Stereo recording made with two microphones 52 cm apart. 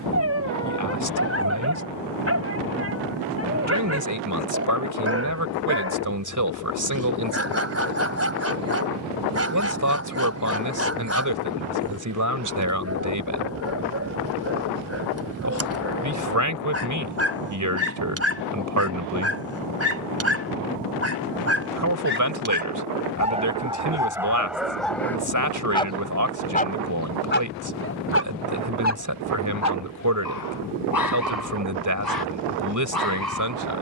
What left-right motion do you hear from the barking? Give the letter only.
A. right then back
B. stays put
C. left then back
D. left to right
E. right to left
E.